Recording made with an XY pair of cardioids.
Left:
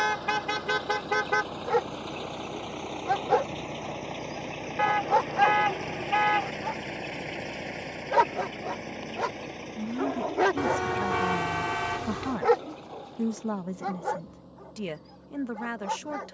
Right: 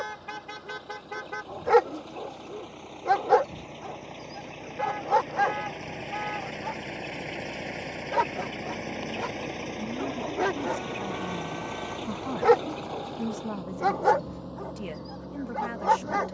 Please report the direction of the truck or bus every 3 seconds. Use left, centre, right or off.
left, left, centre, right, right, right.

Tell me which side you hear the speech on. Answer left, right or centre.
left.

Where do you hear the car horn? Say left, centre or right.
left.